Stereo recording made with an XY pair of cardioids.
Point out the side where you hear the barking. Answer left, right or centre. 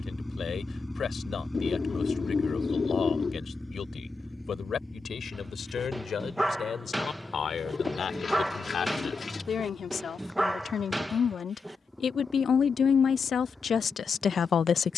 centre.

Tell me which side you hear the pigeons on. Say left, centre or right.
left.